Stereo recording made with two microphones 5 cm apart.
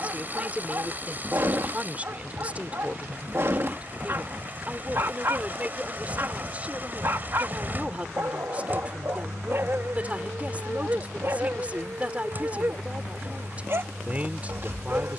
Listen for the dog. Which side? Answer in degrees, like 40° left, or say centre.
50° right.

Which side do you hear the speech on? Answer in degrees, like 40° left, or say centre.
30° right.